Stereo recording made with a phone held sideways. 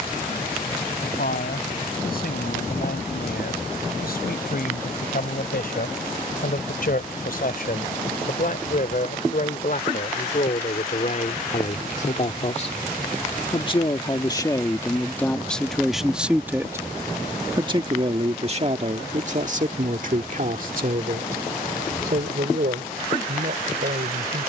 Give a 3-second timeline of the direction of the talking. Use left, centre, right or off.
left, left, left, left, left, centre, right, right.